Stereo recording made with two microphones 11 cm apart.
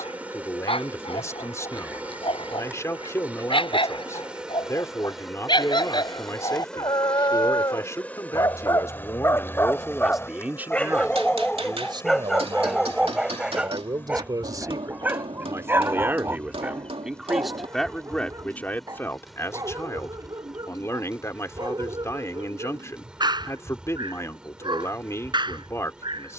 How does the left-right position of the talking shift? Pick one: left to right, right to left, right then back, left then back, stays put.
right then back.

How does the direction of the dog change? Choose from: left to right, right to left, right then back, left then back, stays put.
left to right.